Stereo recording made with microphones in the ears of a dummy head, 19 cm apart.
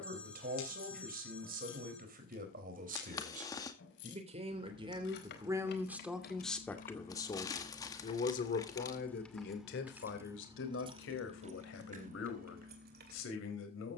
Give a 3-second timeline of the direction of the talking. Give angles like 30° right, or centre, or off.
50° right, 30° right, 20° left, 60° left, 70° left.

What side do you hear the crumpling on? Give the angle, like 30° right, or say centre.
20° left.